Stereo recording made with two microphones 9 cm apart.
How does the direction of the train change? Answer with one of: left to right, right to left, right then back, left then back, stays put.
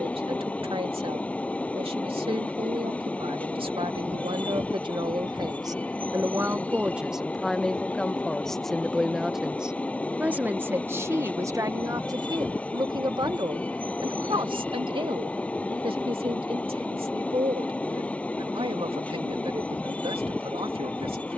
stays put.